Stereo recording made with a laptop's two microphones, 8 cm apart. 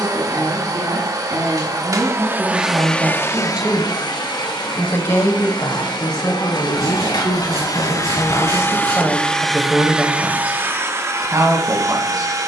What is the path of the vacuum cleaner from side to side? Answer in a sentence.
You can hear the vacuum cleaner go left and come back.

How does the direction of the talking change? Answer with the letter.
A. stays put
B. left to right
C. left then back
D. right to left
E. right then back
C.